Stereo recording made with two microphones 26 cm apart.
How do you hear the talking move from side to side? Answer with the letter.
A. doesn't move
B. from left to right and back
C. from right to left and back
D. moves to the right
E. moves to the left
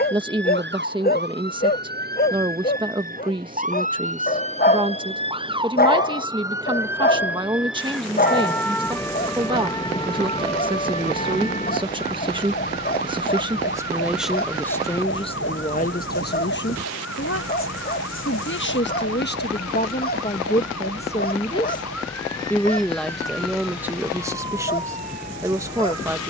C.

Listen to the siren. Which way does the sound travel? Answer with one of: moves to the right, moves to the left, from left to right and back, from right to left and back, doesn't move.
moves to the left.